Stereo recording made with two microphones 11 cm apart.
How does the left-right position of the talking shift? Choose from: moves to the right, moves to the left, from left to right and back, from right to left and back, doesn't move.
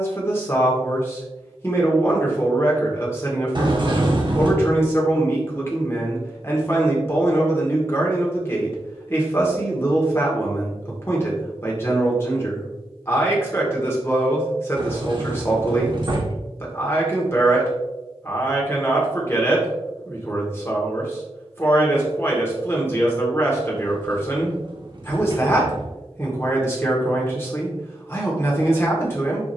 doesn't move.